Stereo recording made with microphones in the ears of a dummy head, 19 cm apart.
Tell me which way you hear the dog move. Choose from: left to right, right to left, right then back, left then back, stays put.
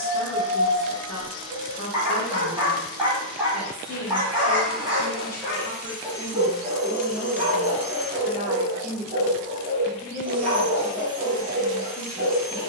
stays put.